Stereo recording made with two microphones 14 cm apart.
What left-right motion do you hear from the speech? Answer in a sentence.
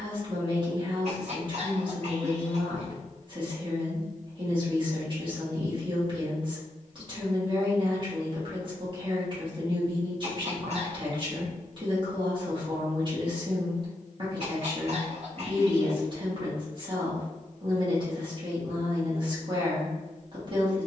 You can hear the speech stay put.